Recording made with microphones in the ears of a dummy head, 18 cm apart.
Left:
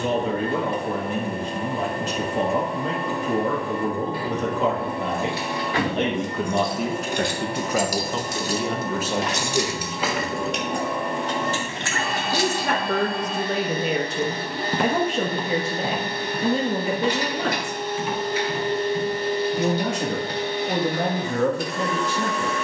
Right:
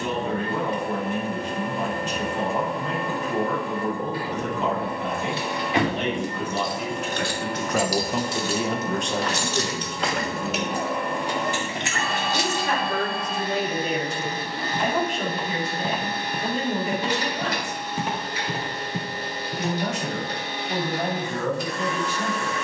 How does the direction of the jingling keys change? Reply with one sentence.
You can hear the jingling keys go left and come back.